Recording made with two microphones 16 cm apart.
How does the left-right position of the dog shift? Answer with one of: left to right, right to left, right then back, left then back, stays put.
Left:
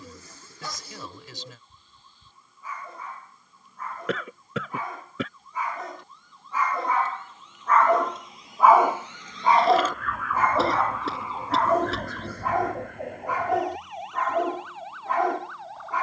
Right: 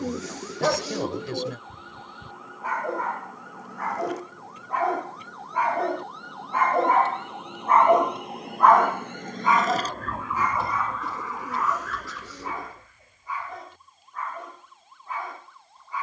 right to left.